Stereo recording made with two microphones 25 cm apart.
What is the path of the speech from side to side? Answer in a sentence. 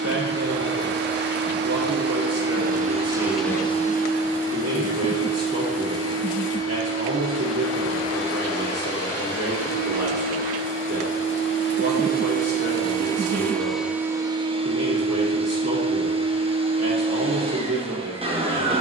You can hear the speech stay put.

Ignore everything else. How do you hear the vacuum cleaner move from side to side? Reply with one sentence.
You can hear the vacuum cleaner go left and come back.